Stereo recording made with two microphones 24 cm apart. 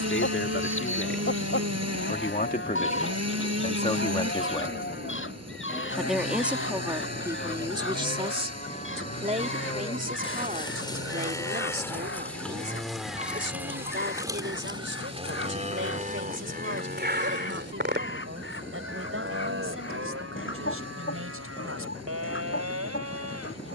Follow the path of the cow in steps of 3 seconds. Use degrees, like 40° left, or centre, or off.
50° left, 40° left, 30° left, 20° left, 10° right, 40° right, 60° right, 70° right.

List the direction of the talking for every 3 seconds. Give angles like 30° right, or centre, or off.
40° left, 20° left, 10° right, 30° right, 50° right, 50° right, 60° right, 60° right.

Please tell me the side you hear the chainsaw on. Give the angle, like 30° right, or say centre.
80° right.